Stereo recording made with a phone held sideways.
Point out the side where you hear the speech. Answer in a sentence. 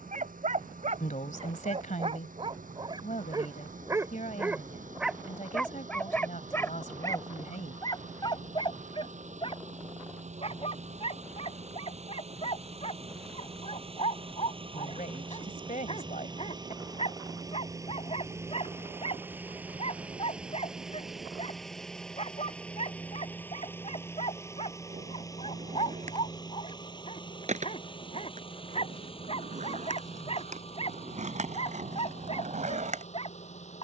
You can hear the speech on the left.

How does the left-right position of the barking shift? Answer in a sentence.
In this clip you hear the barking go from the right side to the left.